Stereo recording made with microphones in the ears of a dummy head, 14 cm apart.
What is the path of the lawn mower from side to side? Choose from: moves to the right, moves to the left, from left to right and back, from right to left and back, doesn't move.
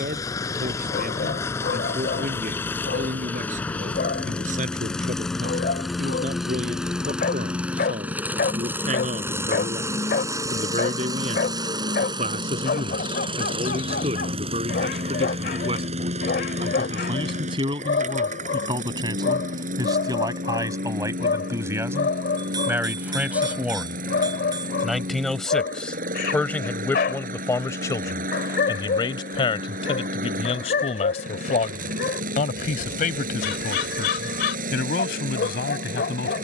moves to the right.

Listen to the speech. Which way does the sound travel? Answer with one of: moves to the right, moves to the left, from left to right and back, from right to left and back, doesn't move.
moves to the left.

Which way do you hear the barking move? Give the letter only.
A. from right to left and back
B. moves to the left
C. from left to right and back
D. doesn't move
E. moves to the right
D.